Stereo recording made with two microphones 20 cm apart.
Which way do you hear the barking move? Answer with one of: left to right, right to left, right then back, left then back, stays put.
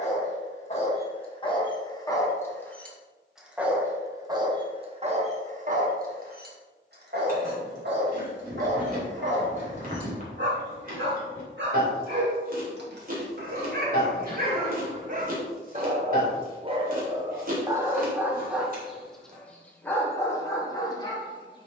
right then back.